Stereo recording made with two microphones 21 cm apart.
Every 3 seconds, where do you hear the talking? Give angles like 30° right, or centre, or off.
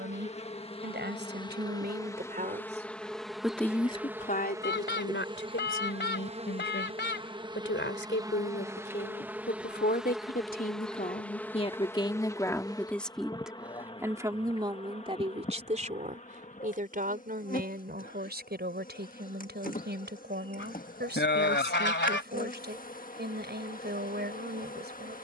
50° right, 40° left, 70° left, 40° left, centre, 40° right, 50° right, 50° right, 50° right.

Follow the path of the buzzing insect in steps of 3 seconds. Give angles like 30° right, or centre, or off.
20° left, 10° right, 20° right, centre, 20° left, 40° left, 40° left, 40° left, 40° left.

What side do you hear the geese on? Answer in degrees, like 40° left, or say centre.
60° left.